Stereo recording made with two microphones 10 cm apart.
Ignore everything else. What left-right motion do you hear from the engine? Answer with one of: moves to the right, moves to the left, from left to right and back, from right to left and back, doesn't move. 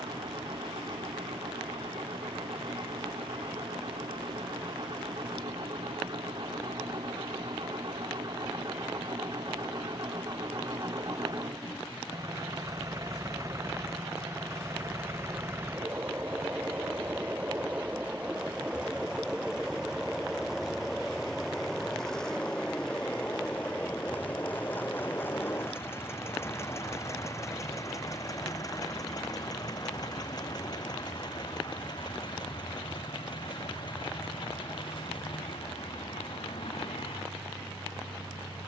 moves to the left.